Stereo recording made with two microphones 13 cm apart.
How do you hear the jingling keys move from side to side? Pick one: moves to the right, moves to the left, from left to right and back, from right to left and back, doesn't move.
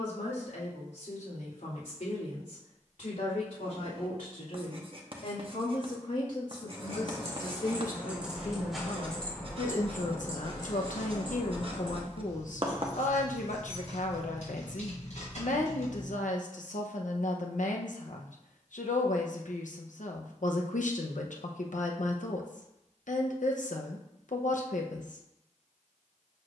moves to the left.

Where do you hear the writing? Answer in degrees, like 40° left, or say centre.
40° right.